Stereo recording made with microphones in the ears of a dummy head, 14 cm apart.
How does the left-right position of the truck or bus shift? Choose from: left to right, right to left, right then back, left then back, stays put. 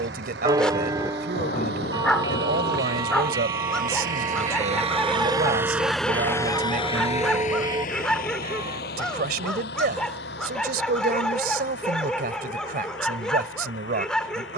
right to left.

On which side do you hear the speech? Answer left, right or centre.
right.